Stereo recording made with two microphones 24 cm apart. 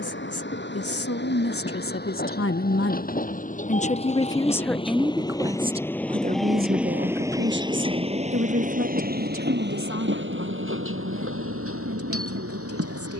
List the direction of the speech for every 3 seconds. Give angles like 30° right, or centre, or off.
60° left, 10° left, 50° right, 60° right, 70° right.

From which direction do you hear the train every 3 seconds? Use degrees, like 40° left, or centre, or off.
40° left, 20° left, 20° right, 50° right, 70° right.